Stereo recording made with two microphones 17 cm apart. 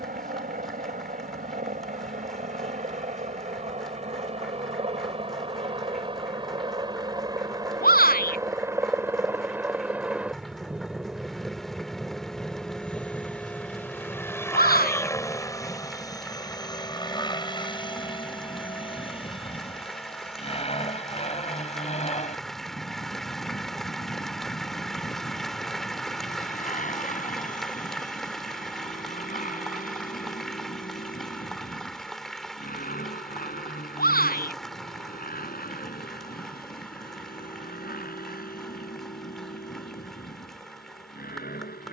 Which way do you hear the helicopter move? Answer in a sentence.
In this clip you hear the helicopter move to the left.